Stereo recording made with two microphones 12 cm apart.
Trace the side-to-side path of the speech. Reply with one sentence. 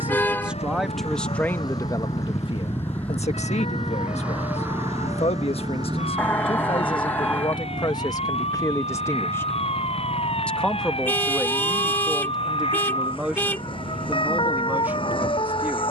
In this clip you hear the speech go left and come back.